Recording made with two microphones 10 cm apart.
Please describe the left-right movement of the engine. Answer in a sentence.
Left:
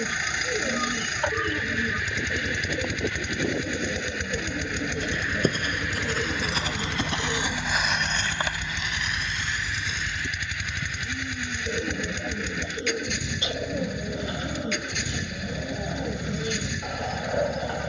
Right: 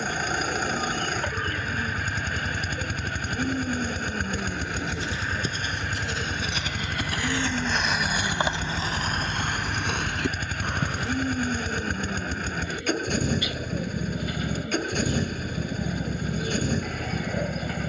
In this clip you hear the engine stay in one place.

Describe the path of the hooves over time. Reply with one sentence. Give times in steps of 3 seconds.
You can hear the hooves on the left from 0 s, in the centre from 6 s, on the right from 9 s and not at all from 12 s.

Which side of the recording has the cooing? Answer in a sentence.
In this clip you hear the cooing on the left.